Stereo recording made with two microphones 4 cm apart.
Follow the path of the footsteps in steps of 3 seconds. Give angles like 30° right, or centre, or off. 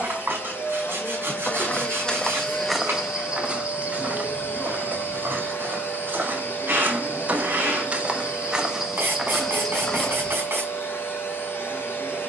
20° left, 40° right, 40° right, 10° left.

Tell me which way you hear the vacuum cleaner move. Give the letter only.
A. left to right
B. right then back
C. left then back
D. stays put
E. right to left
D.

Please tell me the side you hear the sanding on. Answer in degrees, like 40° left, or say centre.
60° right.